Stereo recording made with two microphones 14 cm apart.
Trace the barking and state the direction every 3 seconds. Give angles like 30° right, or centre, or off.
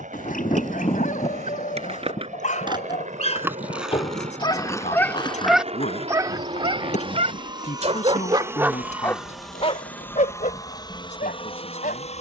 70° left, 30° left, 30° right, 50° left.